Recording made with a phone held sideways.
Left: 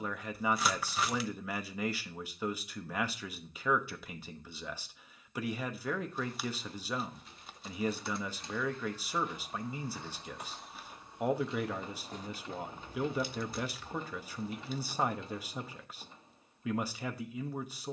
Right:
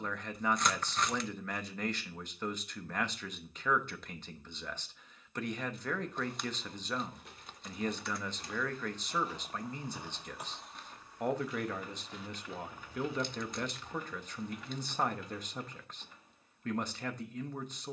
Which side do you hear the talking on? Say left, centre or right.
centre.